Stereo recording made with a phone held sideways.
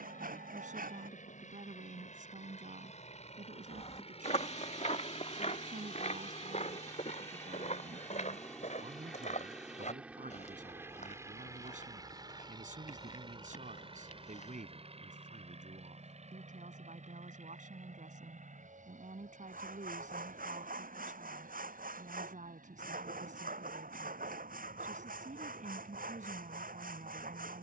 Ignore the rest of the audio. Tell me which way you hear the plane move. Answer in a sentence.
In this clip you hear the plane go from the left side to the right.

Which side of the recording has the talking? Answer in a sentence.
You can hear the talking on the right.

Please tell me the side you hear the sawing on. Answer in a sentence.
You can hear the sawing on the right.